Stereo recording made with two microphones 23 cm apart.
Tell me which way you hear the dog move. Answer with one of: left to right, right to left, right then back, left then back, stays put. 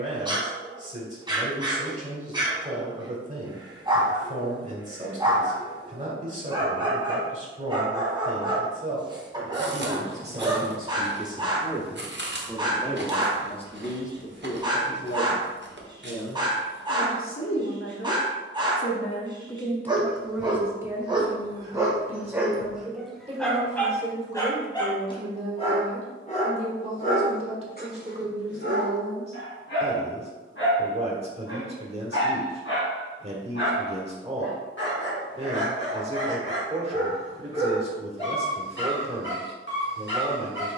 right to left.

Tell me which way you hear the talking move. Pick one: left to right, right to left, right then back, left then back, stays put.
left then back.